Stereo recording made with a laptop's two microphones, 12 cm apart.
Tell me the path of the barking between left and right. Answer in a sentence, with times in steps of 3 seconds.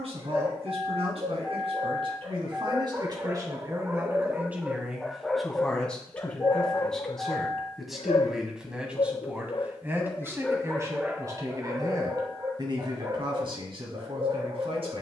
You can hear the barking on the right from 0 s, in the centre from 3 s, on the left from 6 s, in the centre from 9 s and on the right from 12 s.